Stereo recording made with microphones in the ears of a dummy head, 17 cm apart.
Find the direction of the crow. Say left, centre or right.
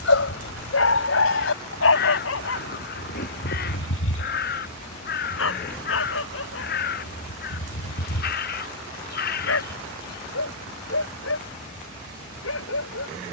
left.